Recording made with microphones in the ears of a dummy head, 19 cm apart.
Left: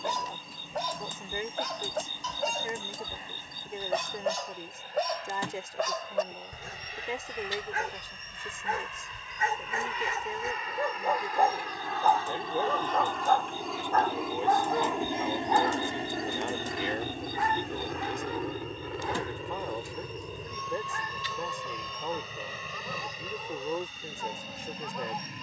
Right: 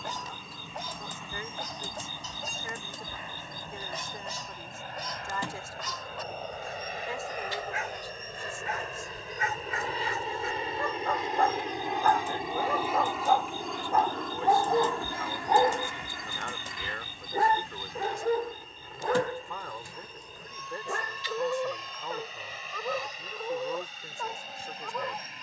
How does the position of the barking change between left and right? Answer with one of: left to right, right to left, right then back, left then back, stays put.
left to right.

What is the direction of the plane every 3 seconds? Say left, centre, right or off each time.
right, right, right, right, centre, left, left, left, left.